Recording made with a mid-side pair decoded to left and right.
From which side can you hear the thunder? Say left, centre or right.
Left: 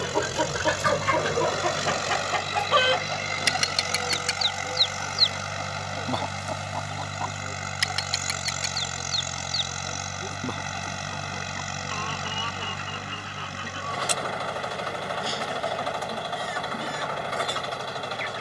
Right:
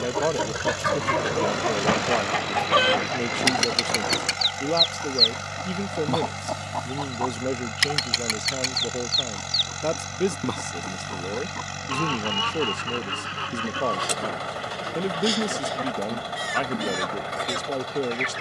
right.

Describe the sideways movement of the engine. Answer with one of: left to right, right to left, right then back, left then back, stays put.
stays put.